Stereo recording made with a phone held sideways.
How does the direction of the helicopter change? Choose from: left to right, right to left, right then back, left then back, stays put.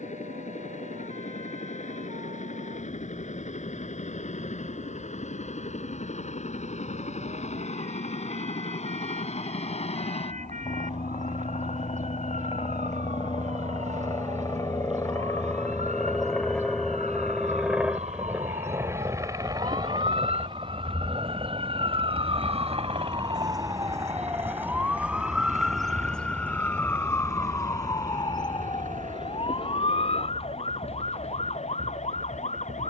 left to right.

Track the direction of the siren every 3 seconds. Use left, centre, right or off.
right, right, right, right, right, right, right, right, centre, left, left.